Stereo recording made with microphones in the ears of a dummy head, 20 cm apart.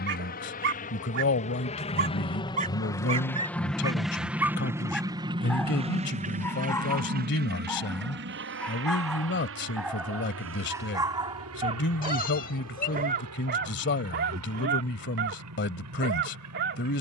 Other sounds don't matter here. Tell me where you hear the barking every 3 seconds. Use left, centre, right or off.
right, centre, centre, centre, right, right.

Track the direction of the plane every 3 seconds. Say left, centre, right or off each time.
left, centre, right, right, right, right.